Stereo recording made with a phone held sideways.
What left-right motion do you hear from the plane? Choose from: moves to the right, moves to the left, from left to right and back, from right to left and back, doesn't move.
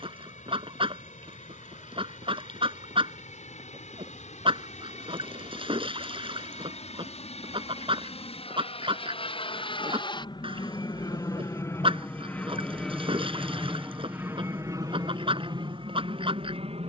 moves to the right.